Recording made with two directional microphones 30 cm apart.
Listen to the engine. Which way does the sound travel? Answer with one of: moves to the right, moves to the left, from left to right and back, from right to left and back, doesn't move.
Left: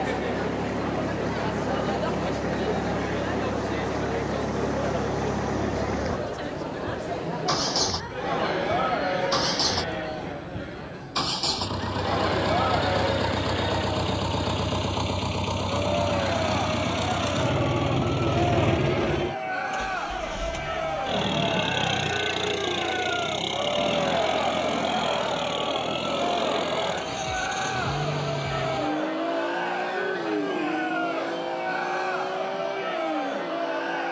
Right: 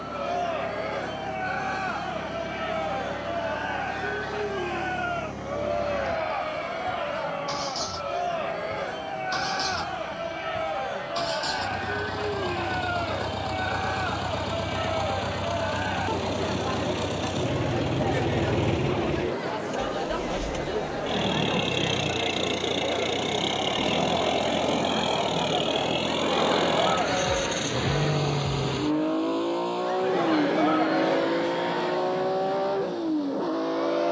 moves to the right.